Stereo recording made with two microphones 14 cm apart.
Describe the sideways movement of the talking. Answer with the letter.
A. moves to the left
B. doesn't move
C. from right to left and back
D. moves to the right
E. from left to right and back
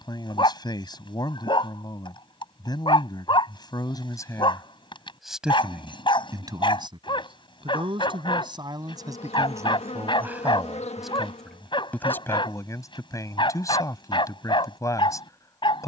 E.